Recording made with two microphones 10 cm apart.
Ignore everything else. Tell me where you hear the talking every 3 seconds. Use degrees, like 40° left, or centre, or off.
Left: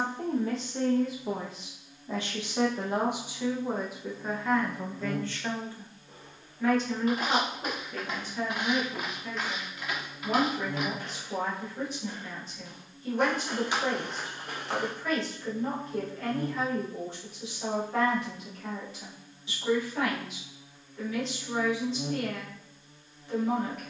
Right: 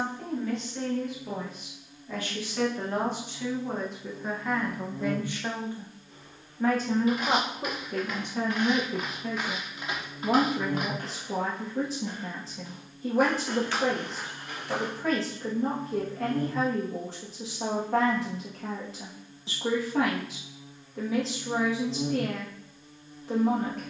30° left, centre, 50° right, 70° right, 80° right, 80° right, 80° right, 80° right.